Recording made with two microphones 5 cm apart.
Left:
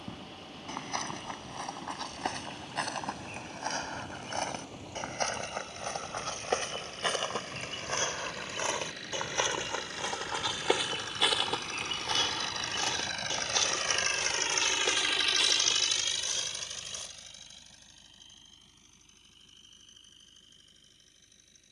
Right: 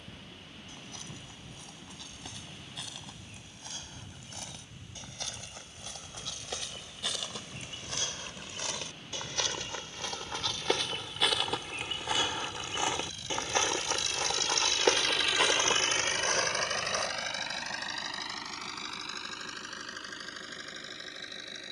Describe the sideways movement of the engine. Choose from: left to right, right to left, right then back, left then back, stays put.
left to right.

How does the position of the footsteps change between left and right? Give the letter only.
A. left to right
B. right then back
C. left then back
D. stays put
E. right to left
A.